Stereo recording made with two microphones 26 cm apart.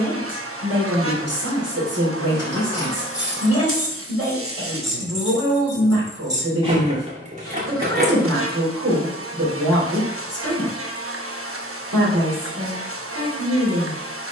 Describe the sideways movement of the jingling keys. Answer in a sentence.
You can hear the jingling keys go from the left side to the right.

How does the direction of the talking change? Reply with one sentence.
In this clip you hear the talking stay in one place.